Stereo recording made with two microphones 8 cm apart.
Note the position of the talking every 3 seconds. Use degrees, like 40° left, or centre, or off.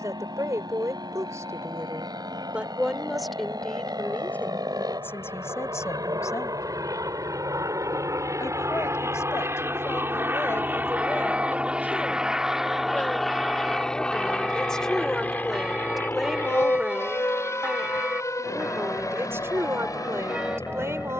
30° right, 20° left, 40° left, 30° left, 10° left, 10° right, 30° right.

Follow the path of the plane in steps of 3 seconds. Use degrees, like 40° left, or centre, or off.
70° right, 60° right, 50° right, 20° right, centre, 30° left, 40° left.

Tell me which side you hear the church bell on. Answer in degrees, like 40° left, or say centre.
10° right.